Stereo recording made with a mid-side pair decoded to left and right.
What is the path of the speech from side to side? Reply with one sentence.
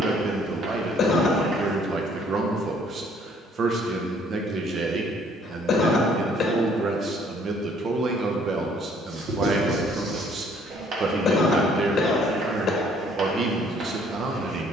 You can hear the speech stay in one place.